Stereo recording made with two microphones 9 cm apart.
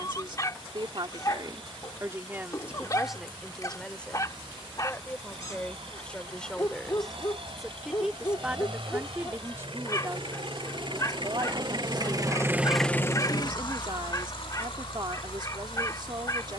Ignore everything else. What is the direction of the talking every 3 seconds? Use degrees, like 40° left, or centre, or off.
40° right, 10° left, centre, 40° right, 60° right, 60° right.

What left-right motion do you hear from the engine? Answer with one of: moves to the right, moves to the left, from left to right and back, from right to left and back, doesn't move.
moves to the left.